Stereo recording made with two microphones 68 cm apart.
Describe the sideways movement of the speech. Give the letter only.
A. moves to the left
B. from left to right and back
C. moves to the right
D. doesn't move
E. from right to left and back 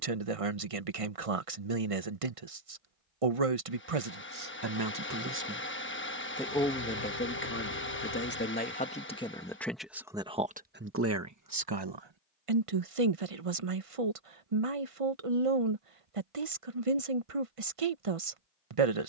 E.